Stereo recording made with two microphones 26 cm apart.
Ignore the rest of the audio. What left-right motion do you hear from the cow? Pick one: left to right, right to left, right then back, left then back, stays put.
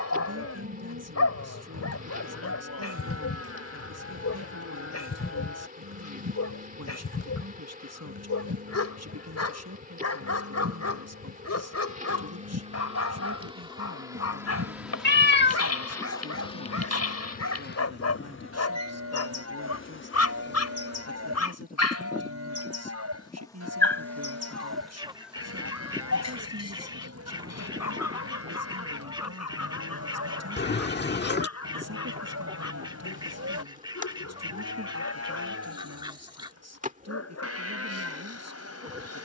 stays put.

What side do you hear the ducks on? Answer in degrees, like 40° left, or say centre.
20° right.